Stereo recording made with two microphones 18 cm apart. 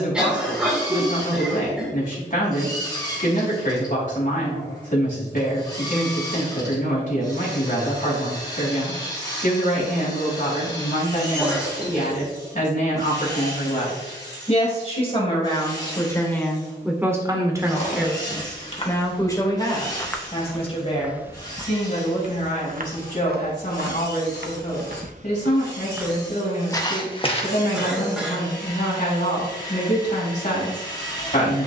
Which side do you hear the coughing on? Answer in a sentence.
In this clip you hear the coughing in the centre.